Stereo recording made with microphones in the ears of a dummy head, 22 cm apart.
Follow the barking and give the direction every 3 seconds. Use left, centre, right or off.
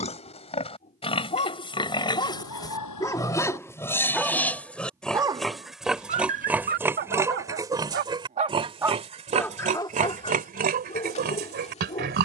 left, centre, right, left.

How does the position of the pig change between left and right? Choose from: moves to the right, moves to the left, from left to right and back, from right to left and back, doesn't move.
moves to the right.